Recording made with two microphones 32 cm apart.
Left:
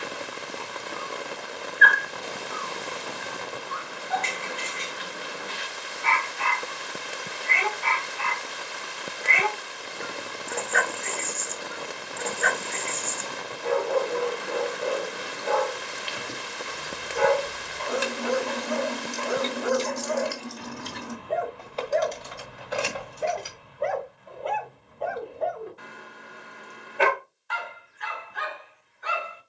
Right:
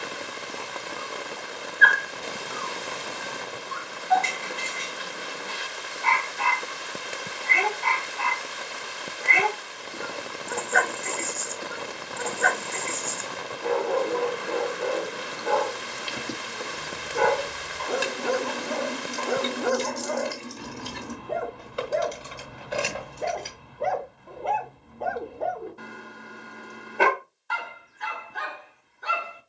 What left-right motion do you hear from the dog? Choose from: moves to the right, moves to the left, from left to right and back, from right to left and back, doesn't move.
doesn't move.